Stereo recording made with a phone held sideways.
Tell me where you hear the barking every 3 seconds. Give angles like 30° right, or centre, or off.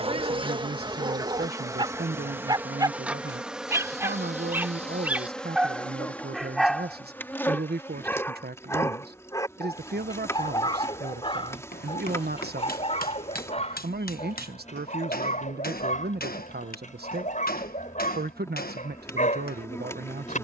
30° right, 10° right, 10° left, 30° left, 40° left, 50° left, 50° left.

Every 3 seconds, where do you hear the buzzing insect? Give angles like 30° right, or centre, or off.
20° right, centre, 10° left, 20° left, 20° left, 20° left, 20° left.